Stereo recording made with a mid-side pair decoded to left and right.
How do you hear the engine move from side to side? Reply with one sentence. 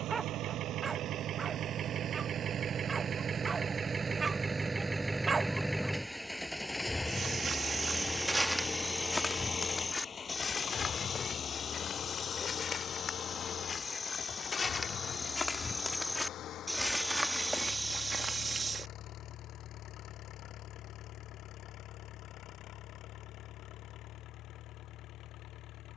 You can hear the engine move from right to left.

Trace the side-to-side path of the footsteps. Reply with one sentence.
In this clip you hear the footsteps move from right to left and back again.